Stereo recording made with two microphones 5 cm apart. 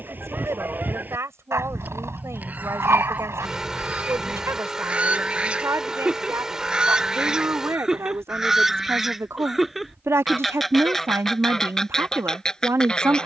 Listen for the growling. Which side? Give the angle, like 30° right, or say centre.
70° right.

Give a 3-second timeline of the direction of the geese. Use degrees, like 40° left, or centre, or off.
40° right, 30° right, 10° right, centre, 20° left.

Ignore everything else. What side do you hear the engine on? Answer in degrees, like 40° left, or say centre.
10° right.